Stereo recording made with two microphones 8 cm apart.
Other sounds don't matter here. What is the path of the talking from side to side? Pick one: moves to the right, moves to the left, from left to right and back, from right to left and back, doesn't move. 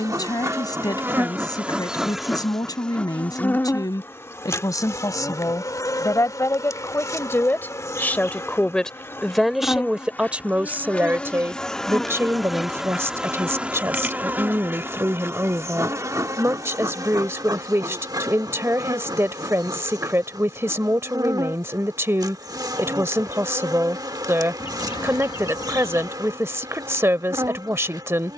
moves to the right.